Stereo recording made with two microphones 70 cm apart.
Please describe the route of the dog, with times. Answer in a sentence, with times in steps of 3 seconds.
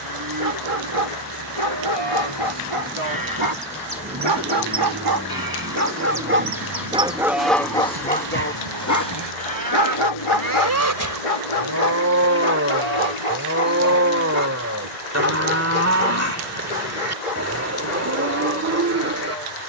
You can hear the dog on the right from 0 s, in the centre from 6 s and on the left from 9 s.